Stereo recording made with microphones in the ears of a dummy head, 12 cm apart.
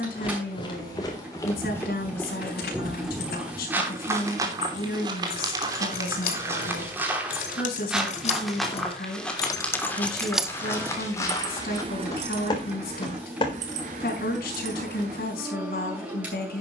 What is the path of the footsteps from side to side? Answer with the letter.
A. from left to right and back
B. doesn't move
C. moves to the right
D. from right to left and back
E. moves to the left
A.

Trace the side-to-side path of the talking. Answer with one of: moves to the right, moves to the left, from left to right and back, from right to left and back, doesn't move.
doesn't move.